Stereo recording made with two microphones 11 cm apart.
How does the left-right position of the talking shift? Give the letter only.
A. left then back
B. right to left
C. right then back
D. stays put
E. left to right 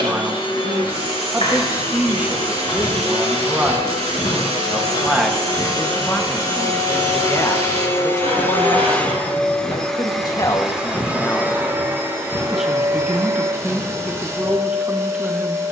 A.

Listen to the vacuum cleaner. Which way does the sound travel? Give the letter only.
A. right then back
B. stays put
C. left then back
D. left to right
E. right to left
D.